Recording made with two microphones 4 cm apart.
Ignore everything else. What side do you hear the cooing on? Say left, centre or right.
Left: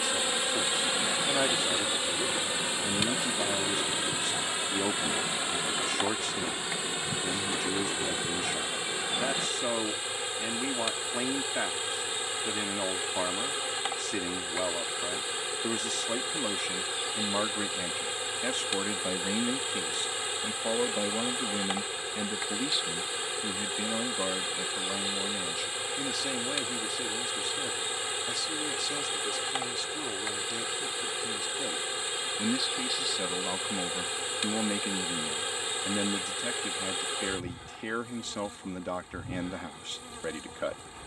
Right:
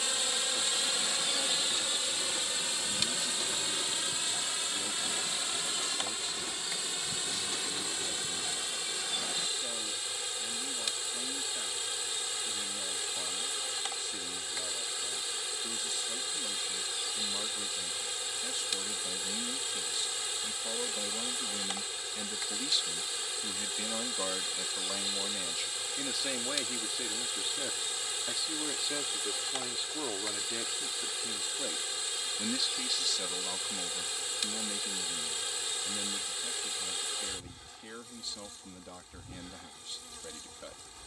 left.